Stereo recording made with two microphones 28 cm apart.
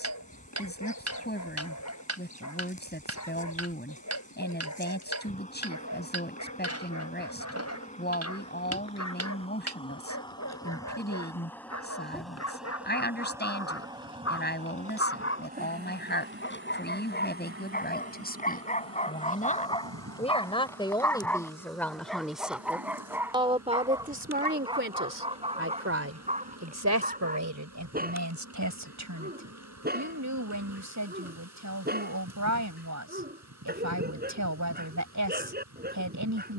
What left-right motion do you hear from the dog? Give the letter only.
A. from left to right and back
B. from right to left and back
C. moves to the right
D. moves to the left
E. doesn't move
C.